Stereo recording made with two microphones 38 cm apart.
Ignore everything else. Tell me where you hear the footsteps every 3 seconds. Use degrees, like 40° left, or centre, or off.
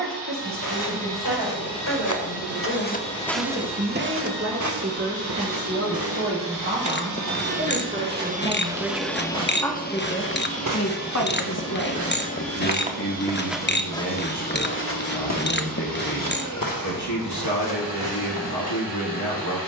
50° left, 40° right, 70° right, 50° right, centre, 60° left, 70° left.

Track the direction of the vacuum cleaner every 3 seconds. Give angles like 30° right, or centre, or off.
80° right, 70° right, 40° right, 30° left, 60° left, 60° left, 60° left.